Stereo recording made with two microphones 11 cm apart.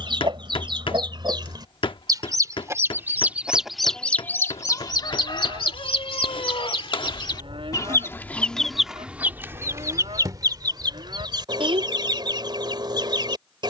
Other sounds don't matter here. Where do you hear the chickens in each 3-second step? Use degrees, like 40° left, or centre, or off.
40° right, 30° left, 40° left, 30° right, 50° right.